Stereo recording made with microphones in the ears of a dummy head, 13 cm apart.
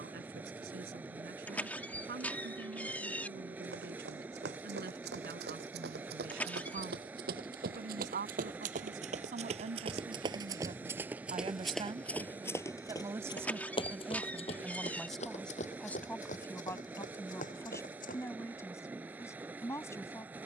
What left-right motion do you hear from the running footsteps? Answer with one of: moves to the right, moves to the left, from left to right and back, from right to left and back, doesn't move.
moves to the left.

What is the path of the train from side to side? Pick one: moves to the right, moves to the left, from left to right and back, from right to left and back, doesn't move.
doesn't move.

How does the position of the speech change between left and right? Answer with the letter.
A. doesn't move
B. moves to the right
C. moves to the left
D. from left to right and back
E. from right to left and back
C.